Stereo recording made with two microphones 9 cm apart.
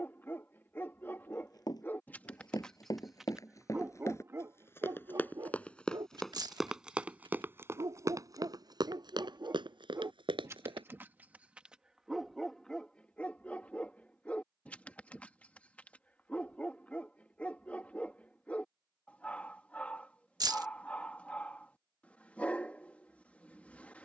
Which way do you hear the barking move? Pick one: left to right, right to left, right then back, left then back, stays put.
right then back.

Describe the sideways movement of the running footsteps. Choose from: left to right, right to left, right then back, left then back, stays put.
left to right.